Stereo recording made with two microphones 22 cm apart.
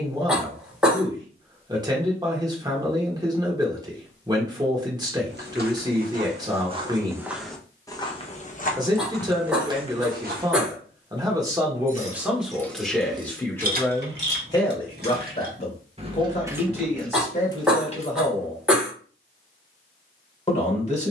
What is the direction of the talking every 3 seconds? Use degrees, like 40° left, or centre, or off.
20° right, 20° right, 20° right, 20° right, 10° left, 30° left, 30° left.